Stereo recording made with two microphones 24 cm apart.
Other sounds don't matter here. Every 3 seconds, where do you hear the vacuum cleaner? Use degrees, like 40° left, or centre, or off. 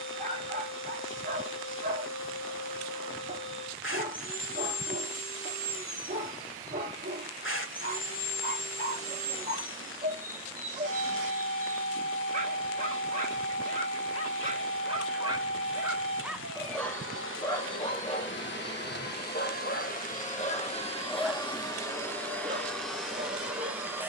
60° left, 60° left, 60° left, 60° left, 60° left, 60° left, 40° left, 10° left.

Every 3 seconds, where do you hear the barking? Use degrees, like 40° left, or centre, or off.
30° right, 30° right, 30° right, 30° right, 30° right, centre, 30° left, 20° right.